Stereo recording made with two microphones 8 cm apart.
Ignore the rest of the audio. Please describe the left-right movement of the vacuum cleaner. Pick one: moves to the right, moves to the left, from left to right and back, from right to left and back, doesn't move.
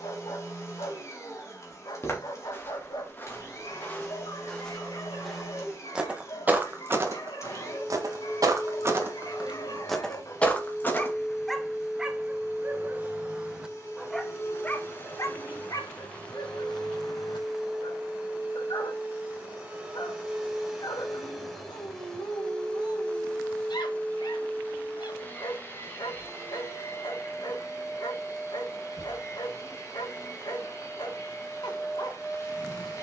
from left to right and back.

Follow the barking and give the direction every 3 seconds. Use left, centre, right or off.
left, left, left, left, centre, left, left, left, left, left, left.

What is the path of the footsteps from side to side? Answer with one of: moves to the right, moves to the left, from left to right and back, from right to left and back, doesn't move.
from left to right and back.